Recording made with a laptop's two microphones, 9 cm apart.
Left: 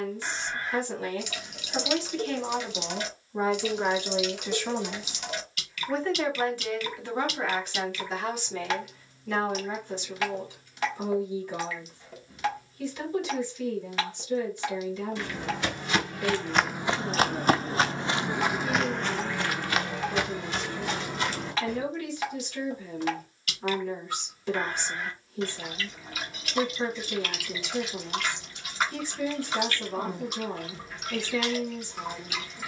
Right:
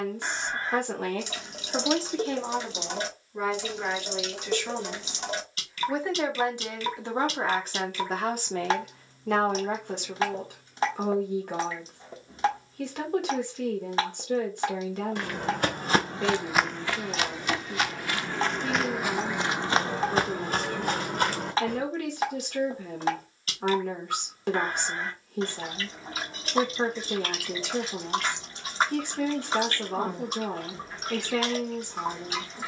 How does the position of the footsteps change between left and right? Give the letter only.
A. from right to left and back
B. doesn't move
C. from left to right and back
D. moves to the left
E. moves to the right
A.